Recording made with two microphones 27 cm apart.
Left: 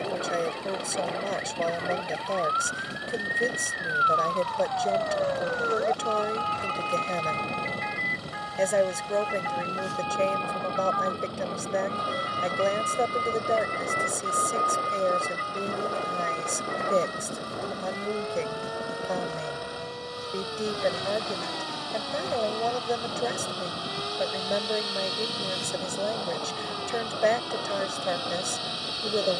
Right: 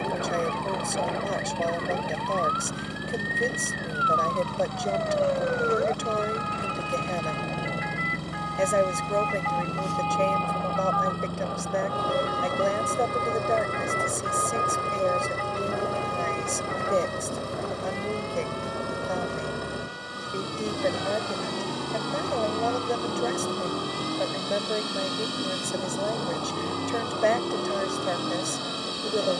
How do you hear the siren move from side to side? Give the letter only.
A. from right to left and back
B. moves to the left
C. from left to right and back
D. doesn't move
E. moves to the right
B.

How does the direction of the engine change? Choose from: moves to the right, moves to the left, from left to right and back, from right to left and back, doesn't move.
doesn't move.